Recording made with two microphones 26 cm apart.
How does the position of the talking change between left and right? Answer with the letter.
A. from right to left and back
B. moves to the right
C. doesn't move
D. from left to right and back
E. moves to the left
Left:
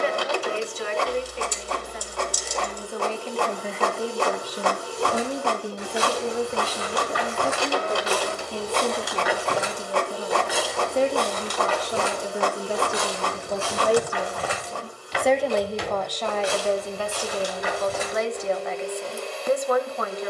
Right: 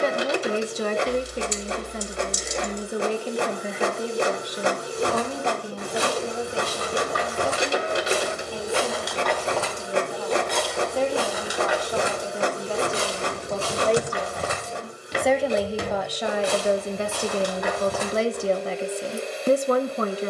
A.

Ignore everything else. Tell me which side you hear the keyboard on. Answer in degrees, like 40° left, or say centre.
20° right.